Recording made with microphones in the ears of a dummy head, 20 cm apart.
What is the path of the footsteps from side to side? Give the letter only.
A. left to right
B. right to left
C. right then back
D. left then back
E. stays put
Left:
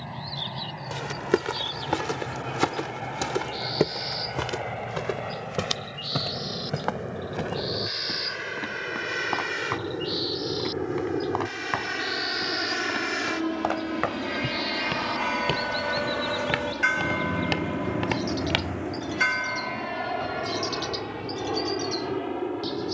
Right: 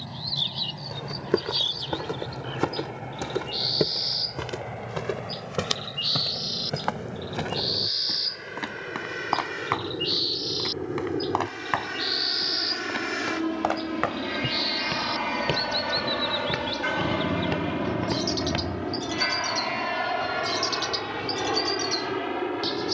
C.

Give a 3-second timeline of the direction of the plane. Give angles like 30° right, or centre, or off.
50° left, 50° left, 40° left, 30° left, 10° left, 20° right, 40° right, 60° right.